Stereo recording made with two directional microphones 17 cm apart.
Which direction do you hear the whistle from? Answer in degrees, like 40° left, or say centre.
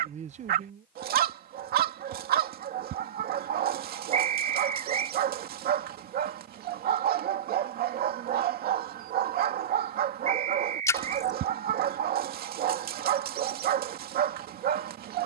40° right.